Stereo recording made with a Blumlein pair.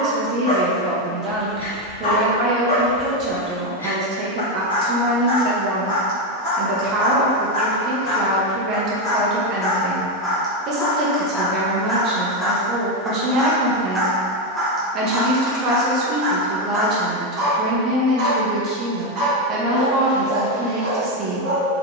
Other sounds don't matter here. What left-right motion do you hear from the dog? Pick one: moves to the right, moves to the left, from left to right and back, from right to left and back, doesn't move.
moves to the right.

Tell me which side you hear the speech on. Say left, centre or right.
right.